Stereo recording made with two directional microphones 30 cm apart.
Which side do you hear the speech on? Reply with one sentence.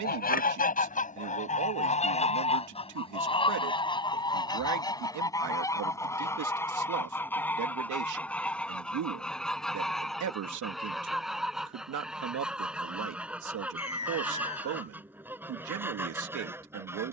You can hear the speech on the right.